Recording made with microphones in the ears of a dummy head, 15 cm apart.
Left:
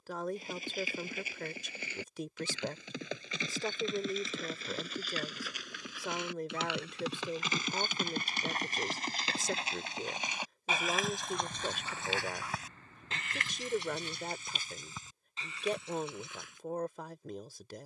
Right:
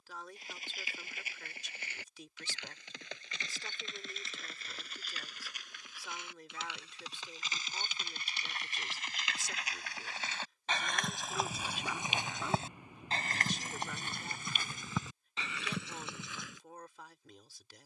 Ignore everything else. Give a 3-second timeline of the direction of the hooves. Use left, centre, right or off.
left, left, left, centre, right, right.